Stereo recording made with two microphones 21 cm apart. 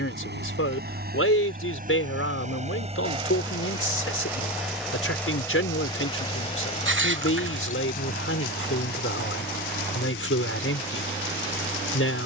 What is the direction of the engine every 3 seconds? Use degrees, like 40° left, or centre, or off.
40° right, 10° right, 40° left, 60° left.